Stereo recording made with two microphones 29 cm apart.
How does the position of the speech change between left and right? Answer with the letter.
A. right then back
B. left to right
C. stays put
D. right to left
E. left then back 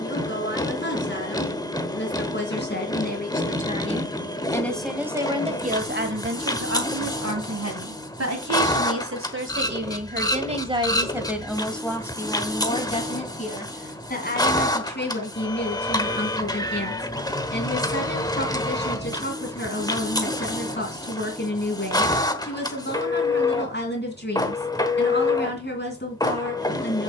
A.